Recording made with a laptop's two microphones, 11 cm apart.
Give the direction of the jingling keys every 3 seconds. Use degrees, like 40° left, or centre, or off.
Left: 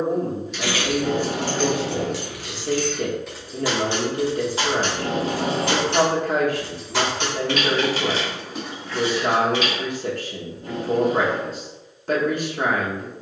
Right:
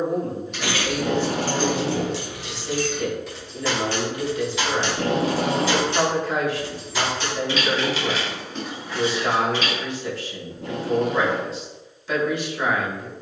30° right, 30° left, 40° left, 30° right, off.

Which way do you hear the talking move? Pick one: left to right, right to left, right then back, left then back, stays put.
stays put.